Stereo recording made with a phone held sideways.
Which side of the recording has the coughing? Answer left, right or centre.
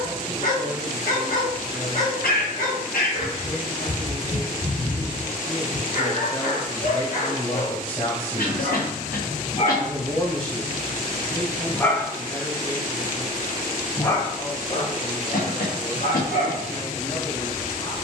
left.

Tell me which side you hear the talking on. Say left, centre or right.
left.